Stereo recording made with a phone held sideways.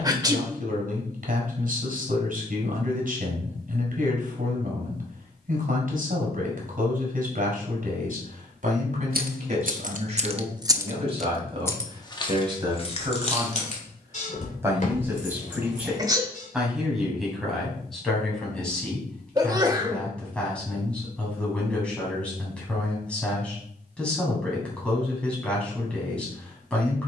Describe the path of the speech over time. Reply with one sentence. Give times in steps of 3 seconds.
In this clip you hear the speech on the right from 0 s and in the centre from 15 s.